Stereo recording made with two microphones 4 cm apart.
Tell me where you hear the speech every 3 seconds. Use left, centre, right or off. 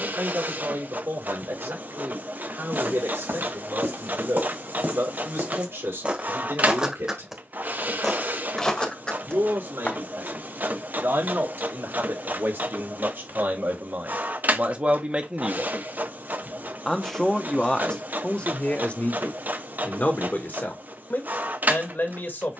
right, right, right, right, right, centre, left, left.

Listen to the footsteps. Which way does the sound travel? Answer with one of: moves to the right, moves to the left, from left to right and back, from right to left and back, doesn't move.
moves to the left.